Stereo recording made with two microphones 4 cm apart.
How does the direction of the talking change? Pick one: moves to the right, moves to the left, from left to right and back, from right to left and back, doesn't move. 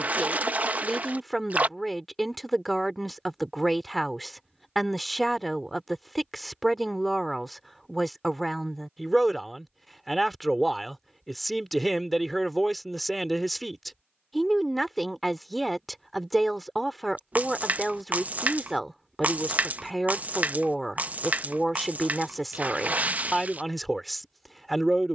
doesn't move.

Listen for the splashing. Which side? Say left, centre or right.
right.